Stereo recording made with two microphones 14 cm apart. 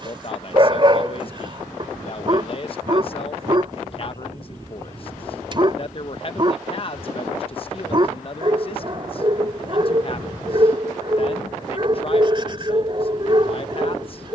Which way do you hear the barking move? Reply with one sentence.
You can hear the barking stay in one place.